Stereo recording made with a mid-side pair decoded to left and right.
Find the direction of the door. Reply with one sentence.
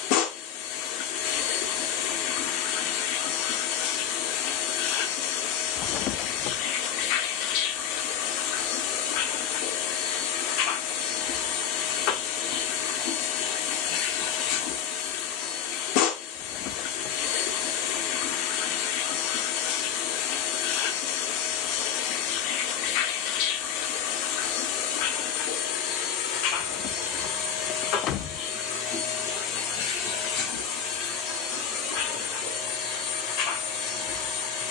You can hear the door on the left.